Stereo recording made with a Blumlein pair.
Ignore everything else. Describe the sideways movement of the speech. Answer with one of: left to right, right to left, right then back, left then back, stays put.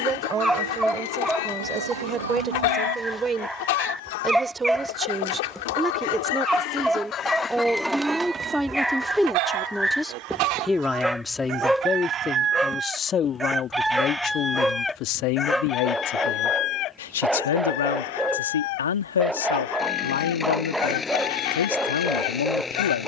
right to left.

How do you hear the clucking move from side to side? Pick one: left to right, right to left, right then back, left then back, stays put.
right then back.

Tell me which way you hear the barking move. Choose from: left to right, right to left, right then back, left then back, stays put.
stays put.